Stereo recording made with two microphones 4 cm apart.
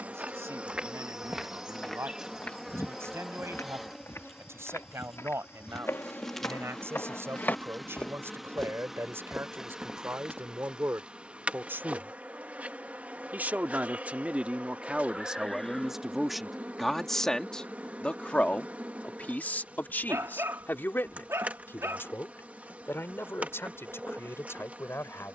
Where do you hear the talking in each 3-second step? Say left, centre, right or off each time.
right, right, right, right, right, centre, left, left, left.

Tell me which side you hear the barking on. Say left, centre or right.
right.